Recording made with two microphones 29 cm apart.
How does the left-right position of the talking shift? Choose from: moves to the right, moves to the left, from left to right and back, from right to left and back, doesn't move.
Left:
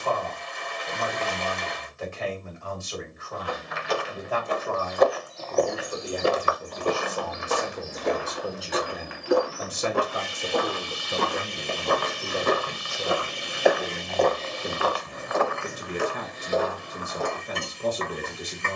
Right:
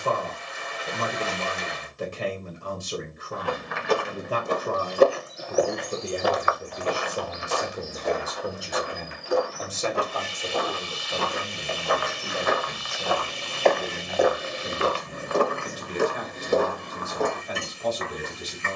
moves to the left.